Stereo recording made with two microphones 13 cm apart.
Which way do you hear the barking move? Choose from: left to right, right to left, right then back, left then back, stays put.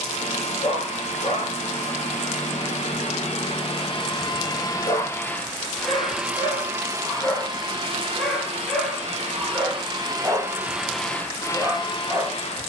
left to right.